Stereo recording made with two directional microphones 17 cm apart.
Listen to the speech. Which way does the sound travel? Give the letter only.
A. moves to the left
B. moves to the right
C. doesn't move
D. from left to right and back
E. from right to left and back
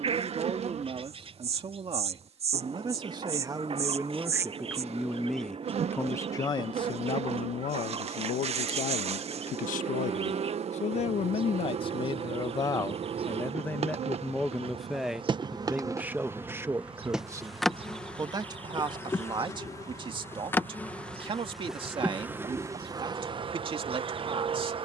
E.